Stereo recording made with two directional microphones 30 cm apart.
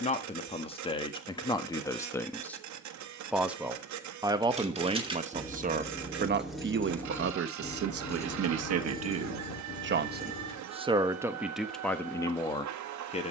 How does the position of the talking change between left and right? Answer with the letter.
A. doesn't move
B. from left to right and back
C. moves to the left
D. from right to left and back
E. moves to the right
B.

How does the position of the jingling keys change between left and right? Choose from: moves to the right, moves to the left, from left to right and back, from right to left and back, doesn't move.
moves to the left.